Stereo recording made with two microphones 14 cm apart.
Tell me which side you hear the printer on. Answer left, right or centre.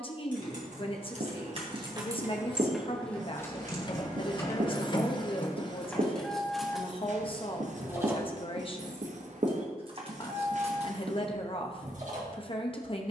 left.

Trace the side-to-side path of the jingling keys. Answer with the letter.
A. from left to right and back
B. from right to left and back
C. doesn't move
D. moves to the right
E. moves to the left
B.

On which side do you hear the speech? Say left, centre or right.
left.